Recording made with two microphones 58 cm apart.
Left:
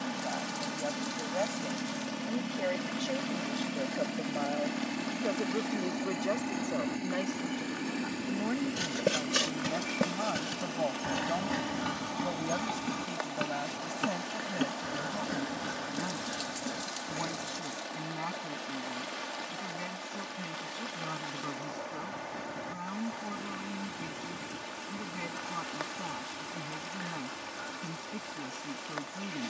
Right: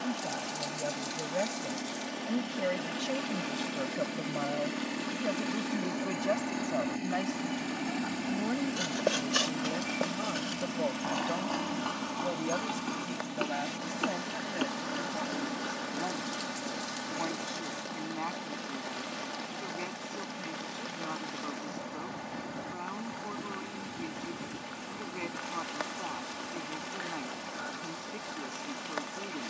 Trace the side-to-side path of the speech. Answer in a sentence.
In this clip you hear the speech move from right to left.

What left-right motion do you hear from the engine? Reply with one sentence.
You can hear the engine move to the right.